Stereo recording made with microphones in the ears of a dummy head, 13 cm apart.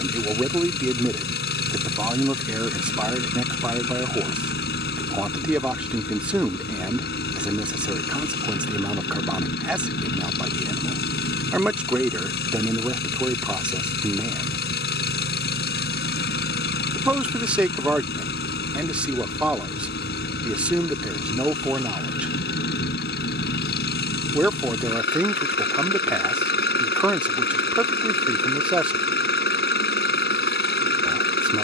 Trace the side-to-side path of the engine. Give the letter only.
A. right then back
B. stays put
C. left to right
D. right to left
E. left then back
B.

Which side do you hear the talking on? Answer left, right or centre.
centre.